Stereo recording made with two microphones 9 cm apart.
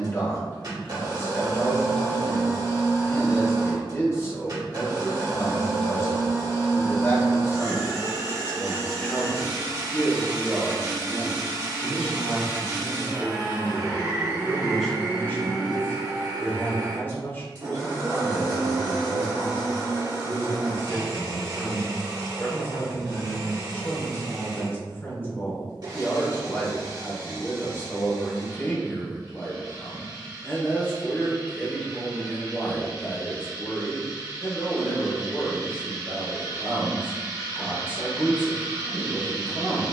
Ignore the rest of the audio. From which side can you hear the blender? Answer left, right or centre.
right.